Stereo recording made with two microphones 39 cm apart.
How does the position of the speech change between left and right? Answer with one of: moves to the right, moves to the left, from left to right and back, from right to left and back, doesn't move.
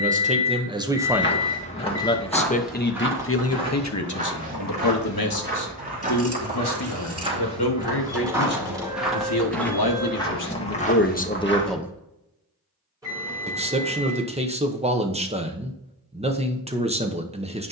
from right to left and back.